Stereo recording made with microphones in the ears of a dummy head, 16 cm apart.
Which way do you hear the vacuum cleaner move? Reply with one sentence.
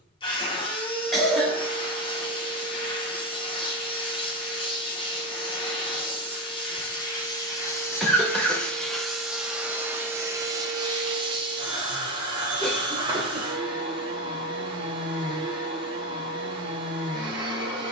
In this clip you hear the vacuum cleaner move from left to right.